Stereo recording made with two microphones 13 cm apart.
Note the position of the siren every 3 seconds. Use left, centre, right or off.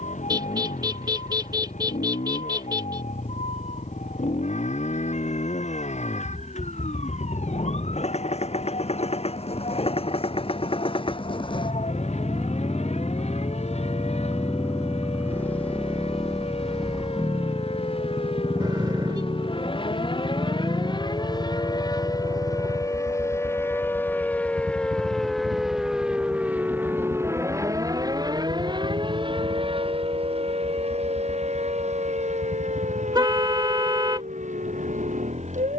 left, left, left, left, left, left, left, left, centre, right, right, right.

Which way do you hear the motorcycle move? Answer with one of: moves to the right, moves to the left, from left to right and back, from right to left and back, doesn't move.
moves to the right.